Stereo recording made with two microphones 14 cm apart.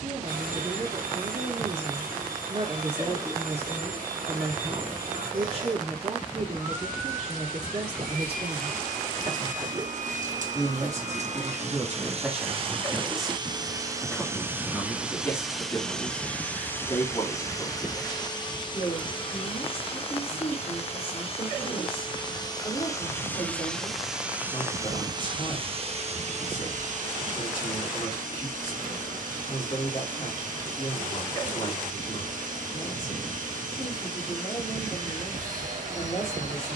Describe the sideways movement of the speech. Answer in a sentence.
You can hear the speech travel towards the left.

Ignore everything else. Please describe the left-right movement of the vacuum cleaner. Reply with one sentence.
In this clip you hear the vacuum cleaner move from right to left and back again.